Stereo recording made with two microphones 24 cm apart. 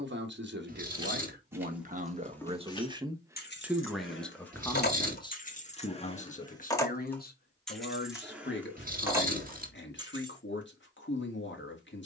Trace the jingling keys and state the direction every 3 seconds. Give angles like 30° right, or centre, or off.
centre, 40° left, centre, 20° right.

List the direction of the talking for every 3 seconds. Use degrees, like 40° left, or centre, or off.
40° right, 10° left, 40° left, 50° left.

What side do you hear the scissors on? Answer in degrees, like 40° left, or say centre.
30° right.